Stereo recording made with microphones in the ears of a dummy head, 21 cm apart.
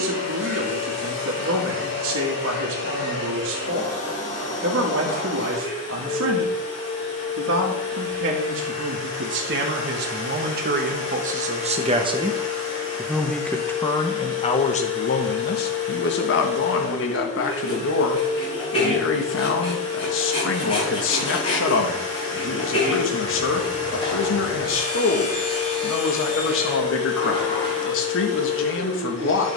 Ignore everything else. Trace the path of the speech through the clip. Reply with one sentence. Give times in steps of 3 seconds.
In this clip you hear the speech on the right from 0 s, in the centre from 12 s and on the left from 15 s.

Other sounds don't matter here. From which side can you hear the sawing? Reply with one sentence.
You can hear the sawing on the left.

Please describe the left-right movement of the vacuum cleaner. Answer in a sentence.
You can hear the vacuum cleaner stay in one place.